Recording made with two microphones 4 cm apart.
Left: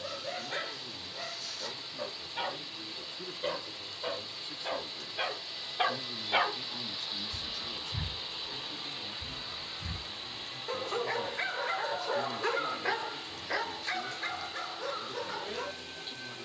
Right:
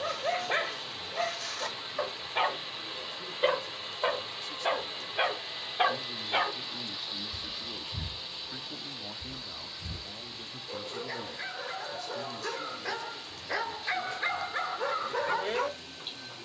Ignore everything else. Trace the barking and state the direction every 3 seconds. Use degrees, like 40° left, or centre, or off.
60° right, 30° right, 30° left, 50° left, centre, 50° right.